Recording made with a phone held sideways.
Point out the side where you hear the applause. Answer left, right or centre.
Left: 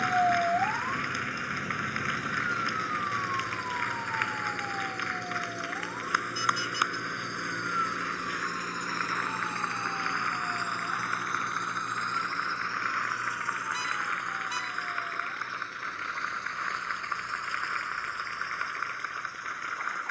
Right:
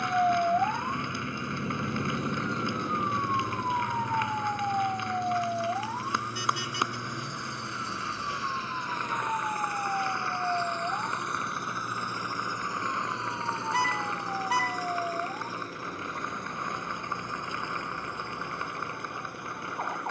right.